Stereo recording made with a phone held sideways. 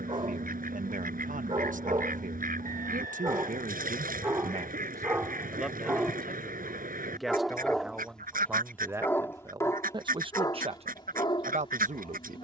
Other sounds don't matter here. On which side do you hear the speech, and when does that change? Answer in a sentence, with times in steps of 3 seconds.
You can hear the speech on the right from 0 s, in the centre from 6 s and on the right from 9 s.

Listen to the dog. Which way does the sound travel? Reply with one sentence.
In this clip you hear the dog go from the right side to the left.